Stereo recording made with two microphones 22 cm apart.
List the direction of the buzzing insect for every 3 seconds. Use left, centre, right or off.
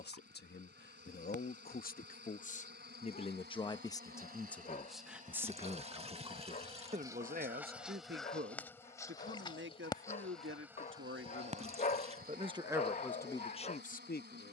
right, right, centre, centre, right.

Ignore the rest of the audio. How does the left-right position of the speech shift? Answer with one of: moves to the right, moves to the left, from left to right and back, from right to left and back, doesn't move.
from left to right and back.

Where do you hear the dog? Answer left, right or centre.
left.